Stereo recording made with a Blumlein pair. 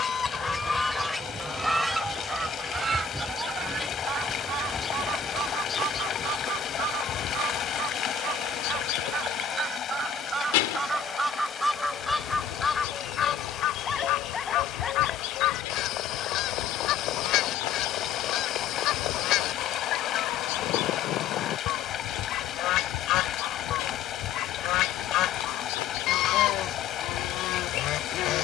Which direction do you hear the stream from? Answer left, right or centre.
left.